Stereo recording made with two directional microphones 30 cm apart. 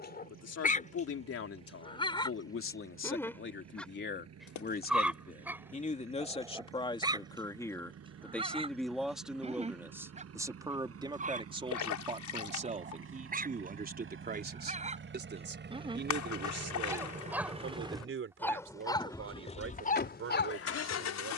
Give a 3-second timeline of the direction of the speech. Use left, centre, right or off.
left, left, centre, centre, right, right, right.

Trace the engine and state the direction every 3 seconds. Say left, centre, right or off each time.
right, right, right, right, right, right, left.